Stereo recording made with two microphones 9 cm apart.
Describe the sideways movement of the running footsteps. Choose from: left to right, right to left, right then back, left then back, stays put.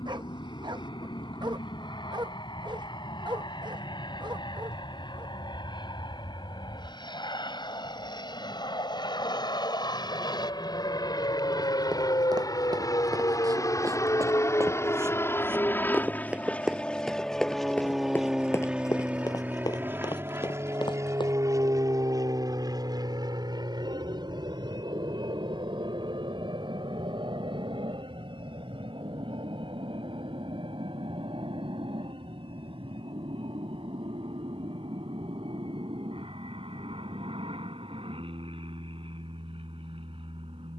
right to left.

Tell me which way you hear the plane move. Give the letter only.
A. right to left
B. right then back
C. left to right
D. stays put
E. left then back
C.